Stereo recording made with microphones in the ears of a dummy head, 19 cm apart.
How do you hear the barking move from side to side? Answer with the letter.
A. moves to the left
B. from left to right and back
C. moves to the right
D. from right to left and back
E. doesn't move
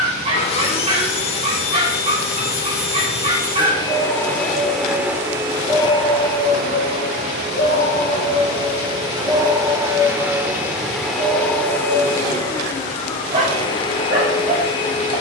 D.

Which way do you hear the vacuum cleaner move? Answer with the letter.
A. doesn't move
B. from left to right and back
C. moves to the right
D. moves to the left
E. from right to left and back
B.